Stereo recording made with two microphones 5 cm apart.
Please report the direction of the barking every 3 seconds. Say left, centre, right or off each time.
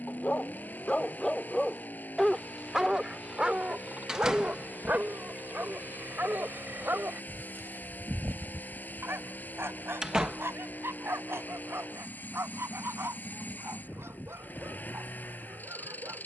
centre, right, right, right, right, right.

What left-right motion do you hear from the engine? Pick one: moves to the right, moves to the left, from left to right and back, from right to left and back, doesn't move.
doesn't move.